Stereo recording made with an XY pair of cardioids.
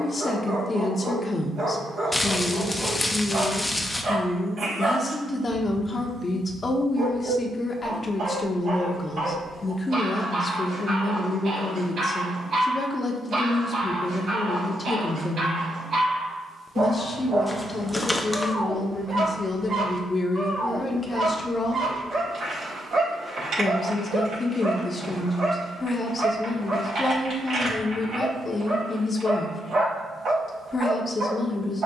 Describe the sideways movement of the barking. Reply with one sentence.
You can hear the barking stay put.